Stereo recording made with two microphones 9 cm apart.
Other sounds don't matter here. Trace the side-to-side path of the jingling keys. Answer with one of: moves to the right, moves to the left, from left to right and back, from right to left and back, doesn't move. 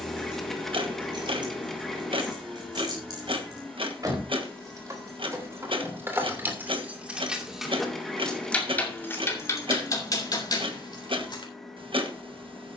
moves to the left.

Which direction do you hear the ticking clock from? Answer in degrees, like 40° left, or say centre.
80° right.